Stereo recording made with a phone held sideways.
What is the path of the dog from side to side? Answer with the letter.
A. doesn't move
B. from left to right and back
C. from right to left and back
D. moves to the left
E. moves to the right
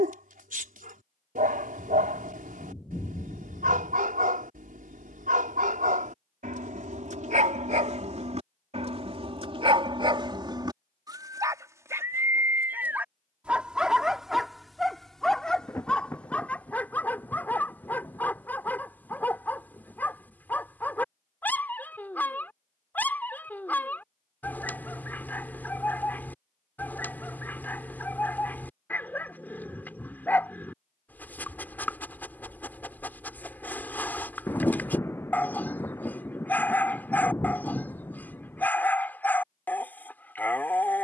D.